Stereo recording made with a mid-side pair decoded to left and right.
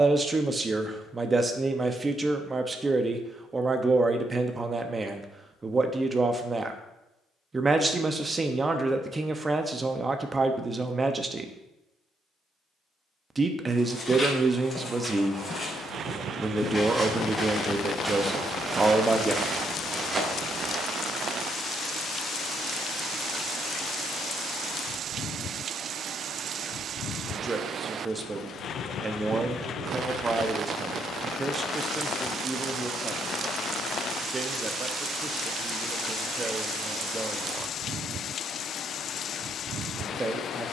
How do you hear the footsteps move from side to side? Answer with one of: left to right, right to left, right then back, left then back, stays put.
left to right.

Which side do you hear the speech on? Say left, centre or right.
right.